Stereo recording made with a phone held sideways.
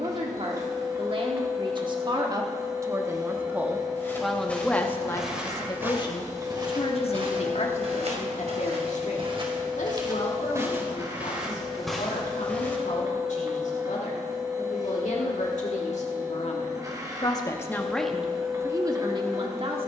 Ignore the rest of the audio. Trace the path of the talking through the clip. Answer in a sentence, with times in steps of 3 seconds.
You can hear the talking on the right from 0 s, in the centre from 3 s, on the left from 6 s and on the right from 18 s.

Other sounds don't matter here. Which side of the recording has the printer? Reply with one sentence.
You can hear the printer on the right.